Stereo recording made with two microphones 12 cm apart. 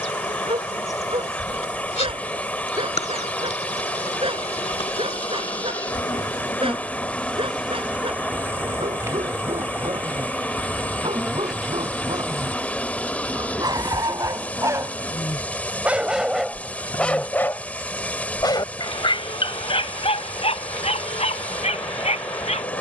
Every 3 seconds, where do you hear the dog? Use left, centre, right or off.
right, right, right, right, right, centre, left, left.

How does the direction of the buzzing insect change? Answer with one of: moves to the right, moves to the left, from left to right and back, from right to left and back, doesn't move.
from left to right and back.